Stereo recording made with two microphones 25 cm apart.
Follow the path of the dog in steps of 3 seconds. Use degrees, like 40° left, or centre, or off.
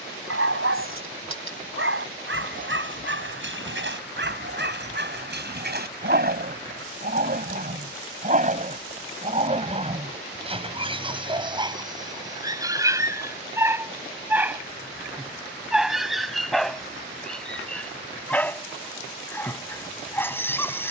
60° right, 50° right, 40° right, 20° right, 10° right, centre, 10° left.